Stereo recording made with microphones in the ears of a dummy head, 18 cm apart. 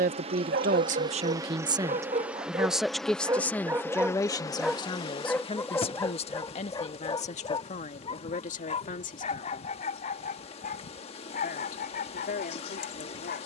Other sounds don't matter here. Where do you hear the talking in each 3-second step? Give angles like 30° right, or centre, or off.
30° right, 20° left, 40° left, 40° left, 50° left.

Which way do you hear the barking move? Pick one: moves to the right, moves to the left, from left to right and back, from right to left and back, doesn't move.
moves to the left.